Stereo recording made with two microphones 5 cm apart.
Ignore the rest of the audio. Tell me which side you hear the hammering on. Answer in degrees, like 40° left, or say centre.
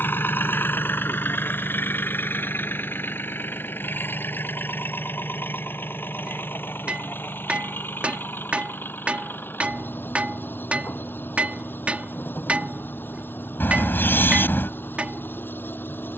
30° right.